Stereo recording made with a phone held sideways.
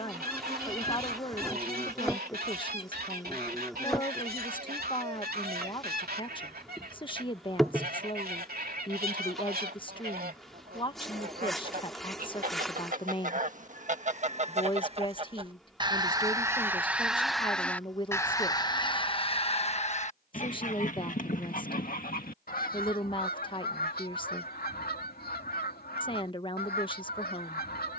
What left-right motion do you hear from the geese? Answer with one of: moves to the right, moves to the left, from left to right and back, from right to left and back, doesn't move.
moves to the left.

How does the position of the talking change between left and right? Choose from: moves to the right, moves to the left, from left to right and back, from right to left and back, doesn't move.
doesn't move.